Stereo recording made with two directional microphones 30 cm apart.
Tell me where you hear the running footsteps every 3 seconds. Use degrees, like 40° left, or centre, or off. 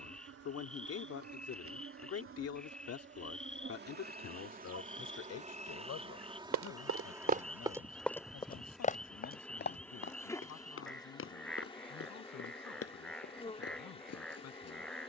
off, off, 20° right, 40° left, 50° left.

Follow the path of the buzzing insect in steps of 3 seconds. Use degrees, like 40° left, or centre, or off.
50° right, 30° right, 10° right, 10° left, 20° left.